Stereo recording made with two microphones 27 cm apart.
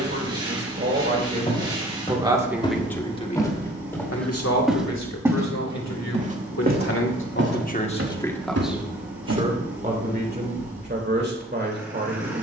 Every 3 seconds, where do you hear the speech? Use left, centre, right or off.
right, left, left, right.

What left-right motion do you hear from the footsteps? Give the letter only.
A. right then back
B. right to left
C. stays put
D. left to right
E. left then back
D.